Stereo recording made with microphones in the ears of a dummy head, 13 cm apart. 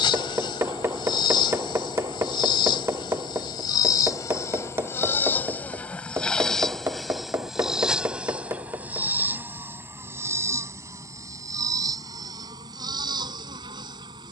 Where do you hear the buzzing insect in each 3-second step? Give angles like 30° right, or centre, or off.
30° left, 20° left, centre, 20° right, 30° right.